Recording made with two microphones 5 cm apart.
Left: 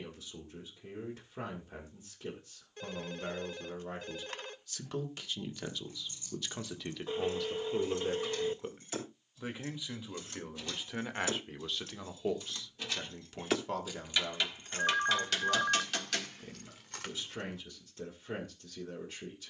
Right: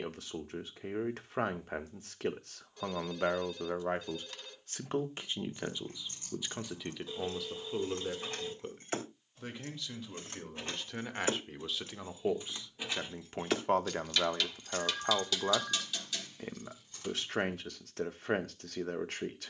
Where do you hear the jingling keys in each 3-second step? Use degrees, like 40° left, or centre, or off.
off, 60° right, 50° right, 40° right, centre, 60° left, off.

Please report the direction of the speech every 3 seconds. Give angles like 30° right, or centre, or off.
70° right, 40° right, centre, 10° left, 40° right, 70° right, 70° right.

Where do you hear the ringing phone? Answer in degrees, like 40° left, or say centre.
40° left.